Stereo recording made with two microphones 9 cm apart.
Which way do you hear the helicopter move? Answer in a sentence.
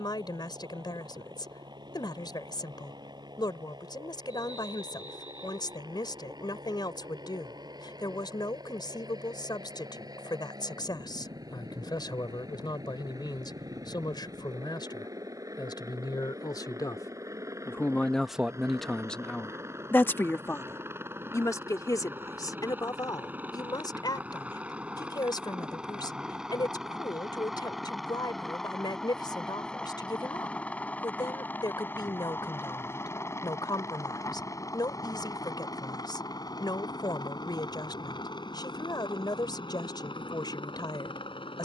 In this clip you hear the helicopter move to the left.